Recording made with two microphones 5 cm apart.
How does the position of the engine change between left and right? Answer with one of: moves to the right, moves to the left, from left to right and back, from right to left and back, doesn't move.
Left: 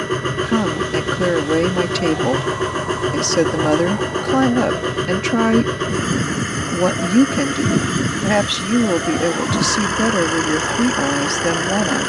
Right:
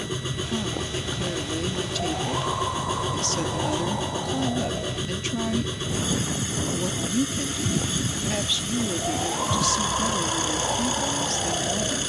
doesn't move.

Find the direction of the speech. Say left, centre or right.
left.